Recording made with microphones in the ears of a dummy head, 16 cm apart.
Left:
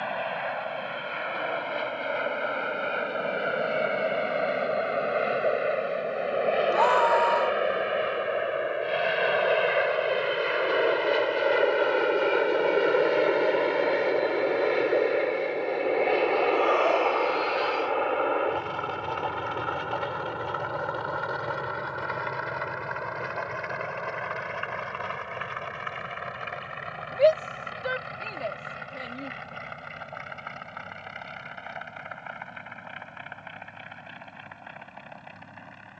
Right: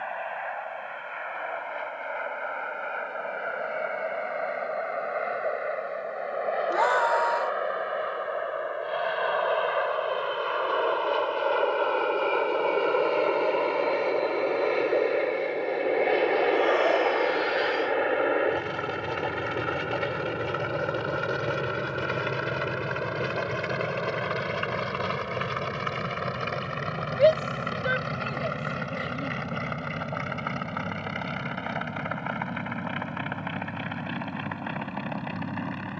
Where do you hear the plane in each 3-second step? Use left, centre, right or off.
left, left, left, left, centre, centre, right, right, right, right, right, right.